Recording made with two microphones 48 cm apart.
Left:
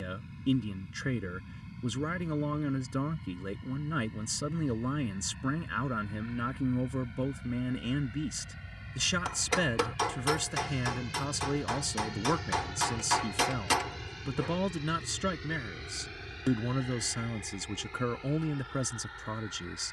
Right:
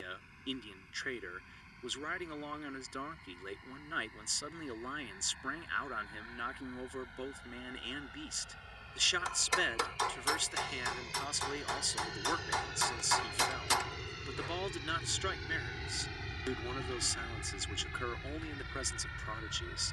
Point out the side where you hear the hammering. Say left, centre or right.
left.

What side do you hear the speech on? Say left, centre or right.
left.